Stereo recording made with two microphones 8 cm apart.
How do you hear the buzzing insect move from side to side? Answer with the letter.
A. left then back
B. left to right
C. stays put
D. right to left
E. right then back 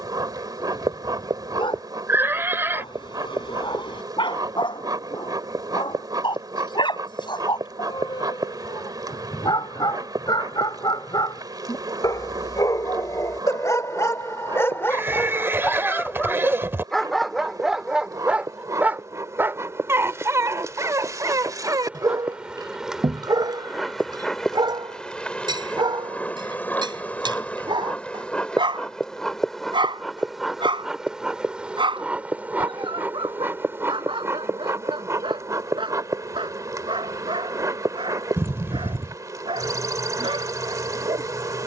A.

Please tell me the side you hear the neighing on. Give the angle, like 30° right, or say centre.
30° right.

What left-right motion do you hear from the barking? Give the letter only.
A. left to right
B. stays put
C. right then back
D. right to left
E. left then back
A.